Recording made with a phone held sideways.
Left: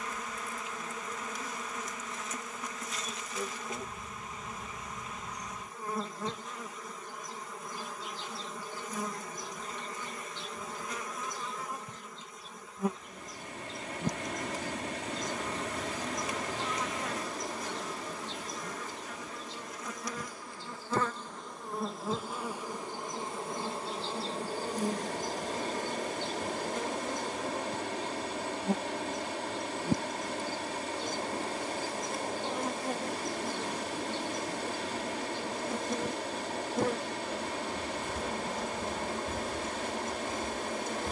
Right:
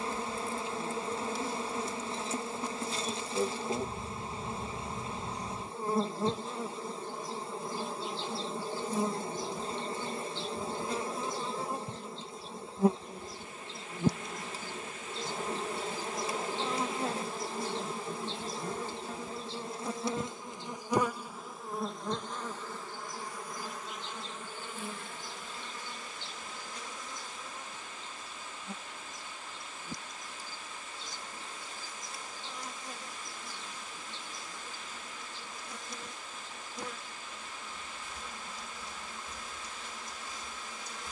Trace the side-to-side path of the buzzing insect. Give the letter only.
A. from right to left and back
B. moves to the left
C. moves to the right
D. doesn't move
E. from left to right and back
B.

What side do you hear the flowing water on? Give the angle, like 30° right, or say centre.
70° left.